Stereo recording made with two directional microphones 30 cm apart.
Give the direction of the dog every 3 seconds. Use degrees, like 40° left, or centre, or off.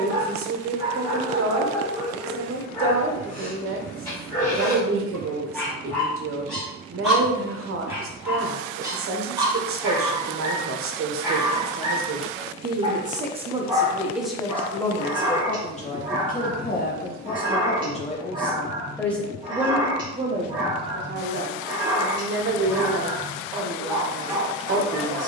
centre, 10° left, centre, 10° right, 10° right, 10° right, 10° right, 10° right, 10° right.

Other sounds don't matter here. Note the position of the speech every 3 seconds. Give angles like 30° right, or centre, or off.
50° right, 50° right, 50° right, 50° right, 10° right, 20° left, centre, 40° right, 40° right.